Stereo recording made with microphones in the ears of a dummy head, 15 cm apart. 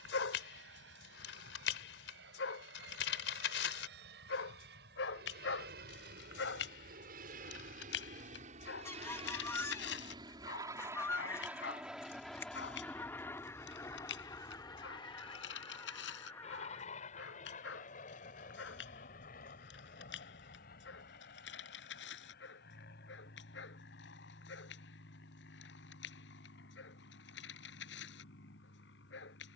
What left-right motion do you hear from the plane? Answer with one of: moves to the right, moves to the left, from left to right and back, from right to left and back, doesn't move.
moves to the left.